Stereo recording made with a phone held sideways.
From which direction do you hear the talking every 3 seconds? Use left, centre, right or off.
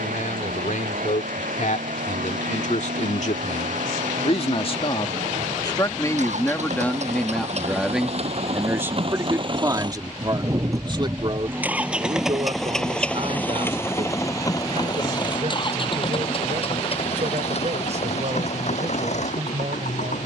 left, left, centre, right, right, right, right.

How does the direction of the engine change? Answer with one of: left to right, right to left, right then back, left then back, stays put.
right to left.